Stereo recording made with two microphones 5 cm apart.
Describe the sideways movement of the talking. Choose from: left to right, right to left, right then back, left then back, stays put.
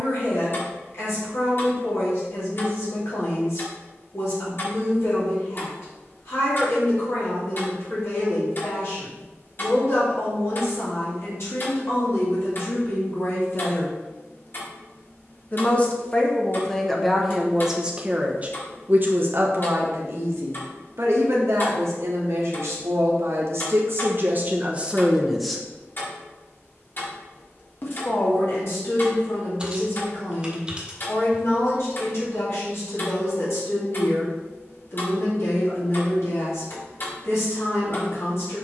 right then back.